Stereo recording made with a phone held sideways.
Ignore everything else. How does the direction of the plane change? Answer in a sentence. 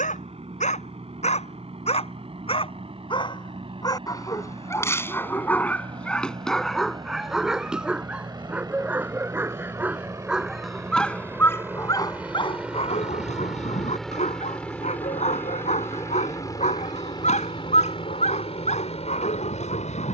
In this clip you hear the plane move to the left.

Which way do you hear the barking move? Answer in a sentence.
In this clip you hear the barking go right and come back.